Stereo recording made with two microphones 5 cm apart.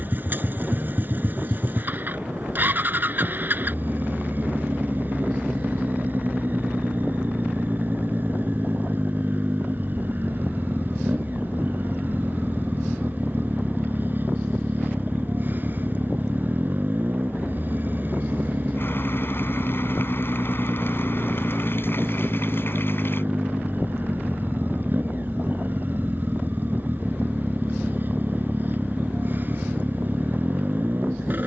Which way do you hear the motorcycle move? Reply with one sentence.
In this clip you hear the motorcycle stay in one place.